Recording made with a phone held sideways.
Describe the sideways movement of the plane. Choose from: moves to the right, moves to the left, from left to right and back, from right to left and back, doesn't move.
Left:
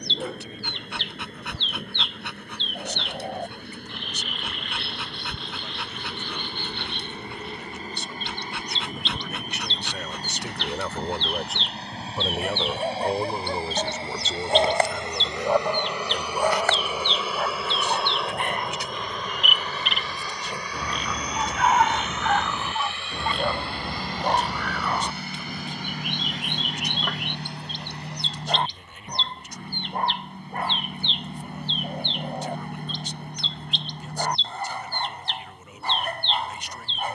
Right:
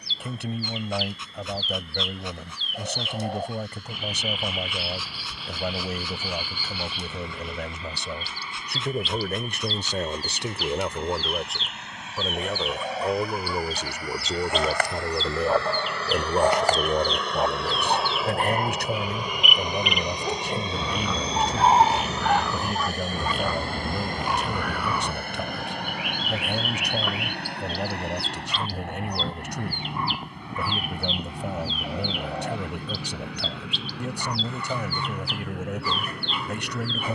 moves to the right.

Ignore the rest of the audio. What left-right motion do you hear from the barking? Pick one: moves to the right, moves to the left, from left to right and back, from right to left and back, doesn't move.
from left to right and back.